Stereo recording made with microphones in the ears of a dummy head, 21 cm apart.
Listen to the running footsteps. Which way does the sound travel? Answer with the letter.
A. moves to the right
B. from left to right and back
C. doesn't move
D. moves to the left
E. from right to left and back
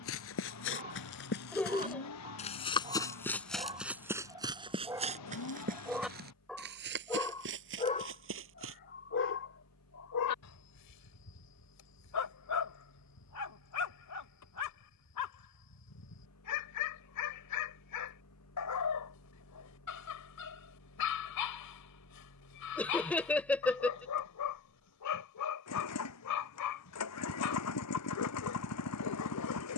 A.